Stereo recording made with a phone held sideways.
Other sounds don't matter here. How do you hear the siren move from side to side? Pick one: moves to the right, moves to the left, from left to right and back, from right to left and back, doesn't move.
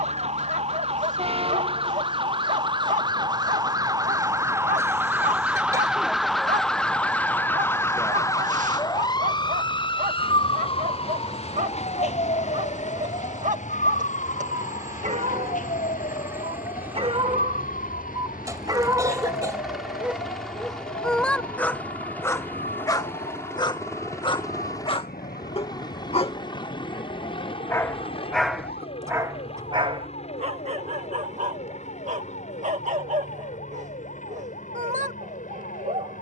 moves to the left.